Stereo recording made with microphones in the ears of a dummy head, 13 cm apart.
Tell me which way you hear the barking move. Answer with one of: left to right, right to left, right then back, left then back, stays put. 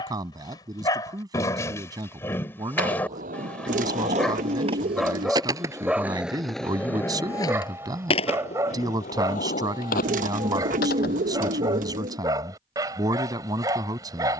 left to right.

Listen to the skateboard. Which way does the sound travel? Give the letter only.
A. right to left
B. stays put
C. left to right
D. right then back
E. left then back
A.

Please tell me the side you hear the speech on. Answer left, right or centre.
right.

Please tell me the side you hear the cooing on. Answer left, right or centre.
right.